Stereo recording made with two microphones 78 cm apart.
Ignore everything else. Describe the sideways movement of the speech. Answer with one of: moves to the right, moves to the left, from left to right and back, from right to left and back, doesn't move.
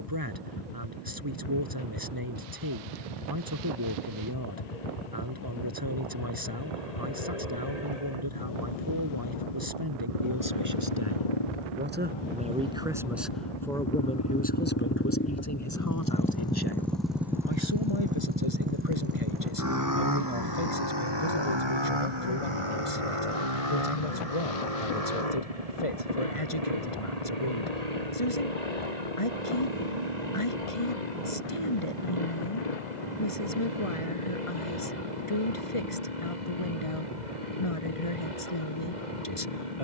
moves to the left.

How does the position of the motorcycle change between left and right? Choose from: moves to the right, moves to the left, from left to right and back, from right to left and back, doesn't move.
moves to the right.